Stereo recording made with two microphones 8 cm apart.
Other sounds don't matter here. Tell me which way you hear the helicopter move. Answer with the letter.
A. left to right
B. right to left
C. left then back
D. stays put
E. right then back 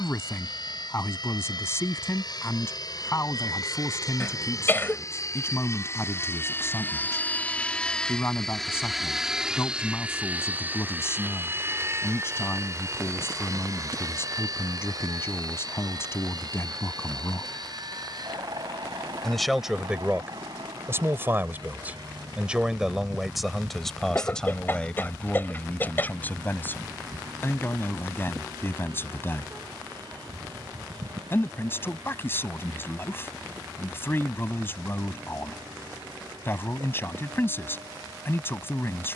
A.